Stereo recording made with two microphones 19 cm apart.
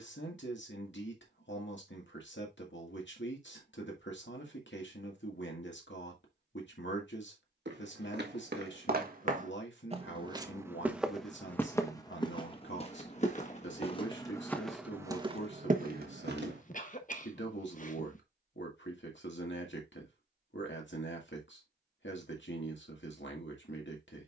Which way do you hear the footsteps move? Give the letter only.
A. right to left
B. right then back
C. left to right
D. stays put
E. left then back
E.